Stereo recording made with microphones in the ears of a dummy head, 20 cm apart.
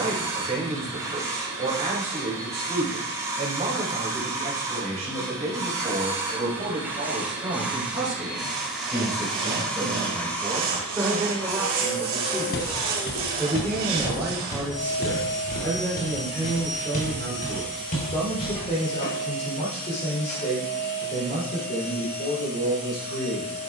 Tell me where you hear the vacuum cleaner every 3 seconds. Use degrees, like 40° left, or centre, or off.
20° right, 20° right, 10° right, 10° left, 20° left, 30° left, 40° left, 40° left.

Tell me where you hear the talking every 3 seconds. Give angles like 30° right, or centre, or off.
30° right, 30° right, 20° right, 10° right, centre, 20° left, 30° left, 50° left.